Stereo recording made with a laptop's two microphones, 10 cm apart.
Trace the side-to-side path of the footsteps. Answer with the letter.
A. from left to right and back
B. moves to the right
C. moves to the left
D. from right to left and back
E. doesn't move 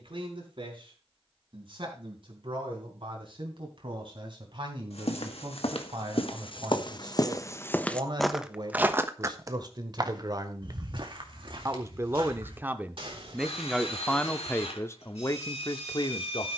B.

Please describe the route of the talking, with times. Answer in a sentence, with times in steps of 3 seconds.
In this clip you hear the talking on the right from 0 s, in the centre from 12 s and on the left from 15 s.